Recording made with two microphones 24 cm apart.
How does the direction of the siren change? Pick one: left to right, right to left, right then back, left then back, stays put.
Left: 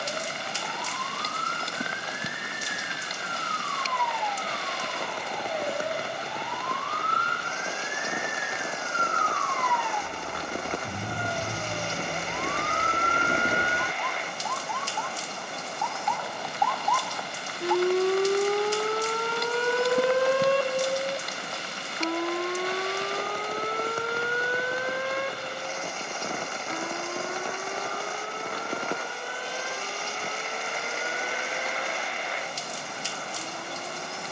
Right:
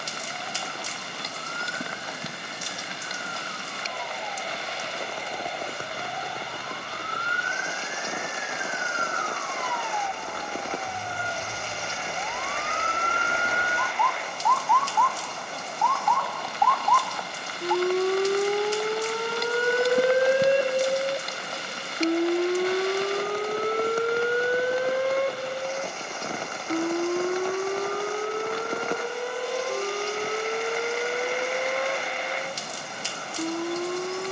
left to right.